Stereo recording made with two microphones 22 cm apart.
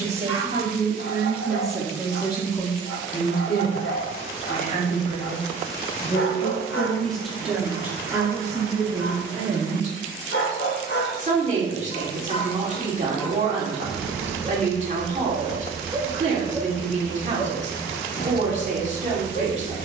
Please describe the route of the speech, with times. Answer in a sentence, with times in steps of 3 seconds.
You can hear the speech in the centre from 0 s, on the left from 3 s, in the centre from 6 s and on the right from 9 s.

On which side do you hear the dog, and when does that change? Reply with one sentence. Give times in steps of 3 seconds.
In this clip you hear the dog on the left from 0 s, in the centre from 12 s and on the left from 18 s.